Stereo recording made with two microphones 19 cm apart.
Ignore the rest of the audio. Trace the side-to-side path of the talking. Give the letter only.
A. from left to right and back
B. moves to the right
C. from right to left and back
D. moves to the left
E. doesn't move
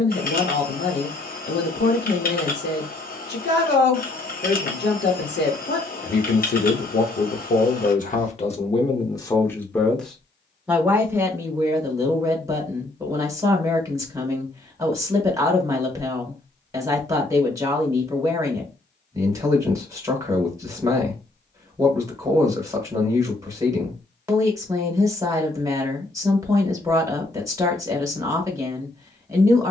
B.